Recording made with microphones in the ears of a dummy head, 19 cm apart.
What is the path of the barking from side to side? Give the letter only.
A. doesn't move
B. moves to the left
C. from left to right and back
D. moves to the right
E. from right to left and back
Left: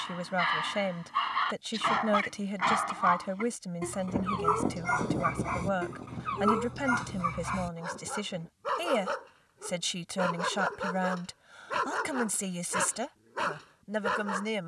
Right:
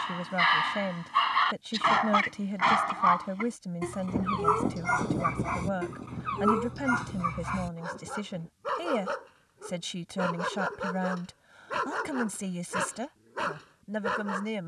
B.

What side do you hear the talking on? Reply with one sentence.
You can hear the talking on the left.